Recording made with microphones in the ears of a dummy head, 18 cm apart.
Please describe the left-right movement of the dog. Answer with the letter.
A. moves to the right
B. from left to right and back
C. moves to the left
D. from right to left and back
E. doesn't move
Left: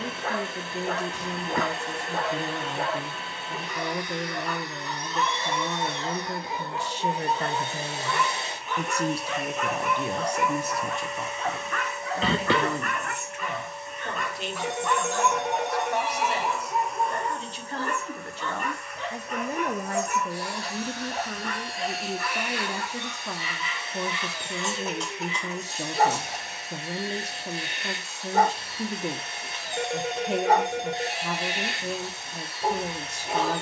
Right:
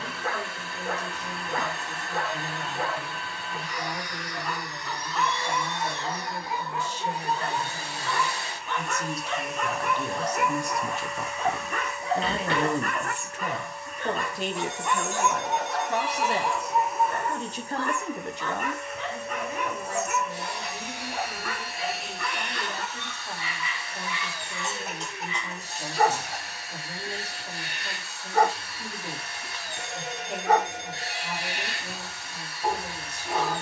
B.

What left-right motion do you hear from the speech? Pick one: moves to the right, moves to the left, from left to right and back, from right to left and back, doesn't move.
from left to right and back.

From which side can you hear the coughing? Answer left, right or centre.
left.